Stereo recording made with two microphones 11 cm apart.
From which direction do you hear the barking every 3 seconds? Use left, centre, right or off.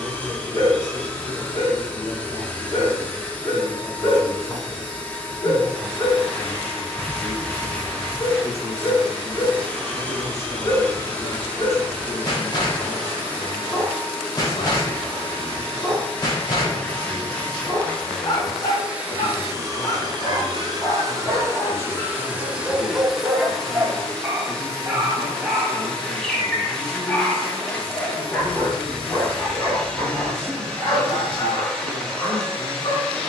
left, left, left, left, left, left, left, centre, centre, left, left.